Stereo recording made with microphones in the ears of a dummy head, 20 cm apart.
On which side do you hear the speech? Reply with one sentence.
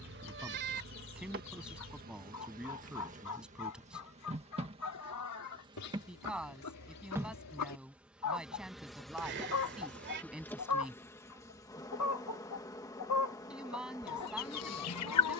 In this clip you hear the speech in the centre.